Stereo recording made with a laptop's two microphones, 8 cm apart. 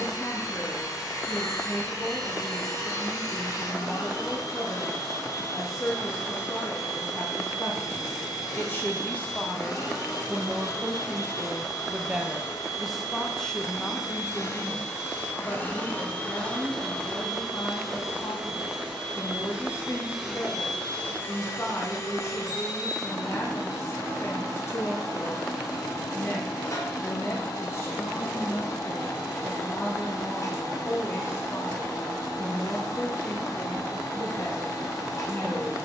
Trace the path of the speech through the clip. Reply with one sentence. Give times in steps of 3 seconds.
You can hear the speech on the left from 0 s, in the centre from 9 s and on the left from 15 s.